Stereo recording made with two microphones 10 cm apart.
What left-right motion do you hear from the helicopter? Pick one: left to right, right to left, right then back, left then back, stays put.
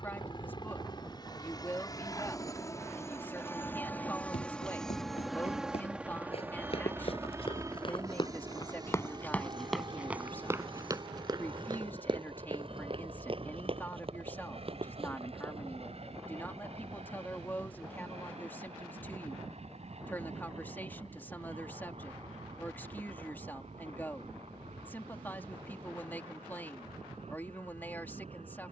left to right.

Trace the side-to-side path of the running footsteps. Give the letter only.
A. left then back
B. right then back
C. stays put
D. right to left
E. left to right
E.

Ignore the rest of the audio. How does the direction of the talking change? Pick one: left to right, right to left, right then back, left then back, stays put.
stays put.